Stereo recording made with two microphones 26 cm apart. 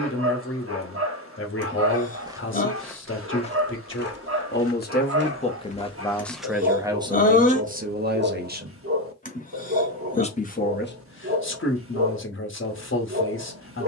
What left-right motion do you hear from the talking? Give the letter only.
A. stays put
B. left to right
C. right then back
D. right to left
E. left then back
C.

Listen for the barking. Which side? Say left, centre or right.
right.